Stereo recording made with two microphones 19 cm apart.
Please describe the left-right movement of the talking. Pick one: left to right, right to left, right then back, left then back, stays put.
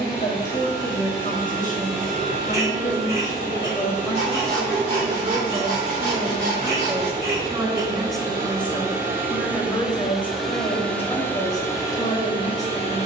right then back.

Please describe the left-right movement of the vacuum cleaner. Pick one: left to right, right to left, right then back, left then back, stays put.
right to left.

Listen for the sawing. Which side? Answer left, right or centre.
right.